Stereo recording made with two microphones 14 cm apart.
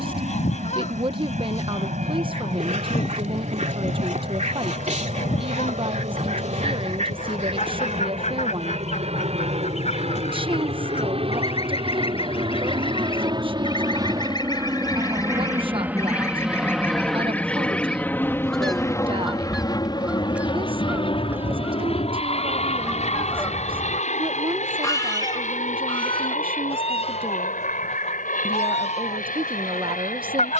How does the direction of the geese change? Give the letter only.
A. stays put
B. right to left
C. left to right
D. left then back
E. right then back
E.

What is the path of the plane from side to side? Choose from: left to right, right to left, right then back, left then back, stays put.
right to left.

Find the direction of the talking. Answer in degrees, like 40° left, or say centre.
40° right.